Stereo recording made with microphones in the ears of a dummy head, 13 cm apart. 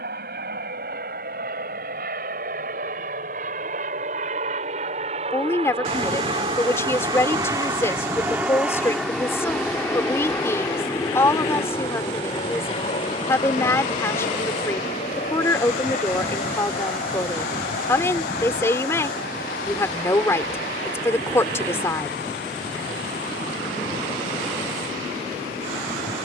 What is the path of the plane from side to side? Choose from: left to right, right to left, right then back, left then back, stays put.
right to left.